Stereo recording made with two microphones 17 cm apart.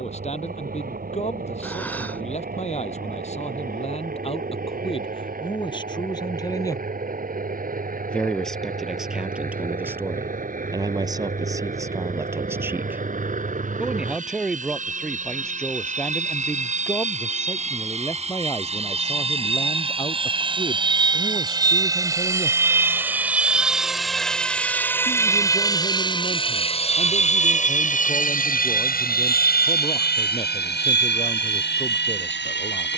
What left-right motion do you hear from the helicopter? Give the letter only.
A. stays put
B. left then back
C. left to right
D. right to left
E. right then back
D.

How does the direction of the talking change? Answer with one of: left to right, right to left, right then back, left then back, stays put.
right then back.